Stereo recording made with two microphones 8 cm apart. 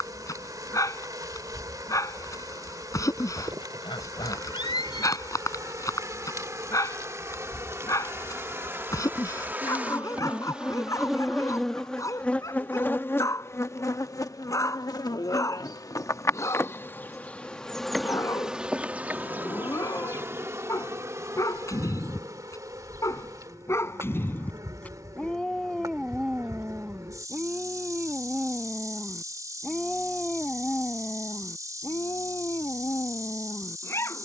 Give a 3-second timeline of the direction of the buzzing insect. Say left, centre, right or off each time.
right, right, right, centre, left, left, right, right, right, right, right, right.